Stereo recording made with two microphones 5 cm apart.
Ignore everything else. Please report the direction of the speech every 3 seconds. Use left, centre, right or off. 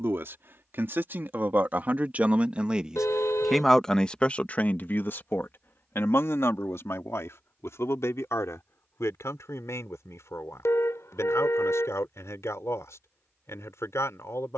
right, left, left, left, left.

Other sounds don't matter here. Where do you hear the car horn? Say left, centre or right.
left.